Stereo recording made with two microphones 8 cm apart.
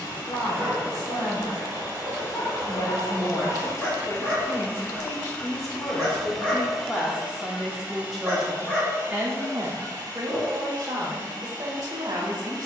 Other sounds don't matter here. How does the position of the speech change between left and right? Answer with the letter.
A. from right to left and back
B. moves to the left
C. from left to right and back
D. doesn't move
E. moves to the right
E.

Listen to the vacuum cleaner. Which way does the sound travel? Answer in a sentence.
In this clip you hear the vacuum cleaner go from the left side to the right.